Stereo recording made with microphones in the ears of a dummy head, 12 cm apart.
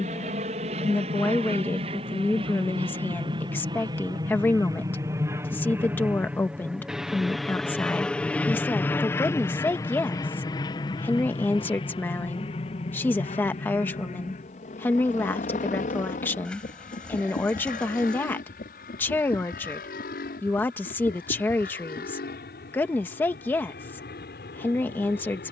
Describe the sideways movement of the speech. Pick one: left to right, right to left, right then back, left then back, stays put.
stays put.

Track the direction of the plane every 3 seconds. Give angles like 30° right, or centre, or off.
50° right, 30° right, centre, 30° left, 40° left, 60° left, 60° left, 70° left, 70° left.